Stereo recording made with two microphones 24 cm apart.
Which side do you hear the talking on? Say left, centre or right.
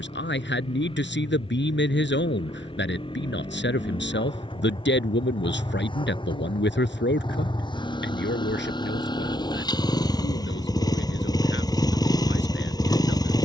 left.